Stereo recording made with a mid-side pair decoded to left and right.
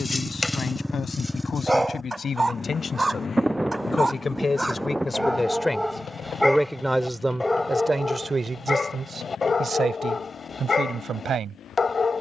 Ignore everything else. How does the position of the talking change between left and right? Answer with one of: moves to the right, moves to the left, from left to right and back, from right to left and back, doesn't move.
moves to the right.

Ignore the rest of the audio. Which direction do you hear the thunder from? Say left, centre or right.
centre.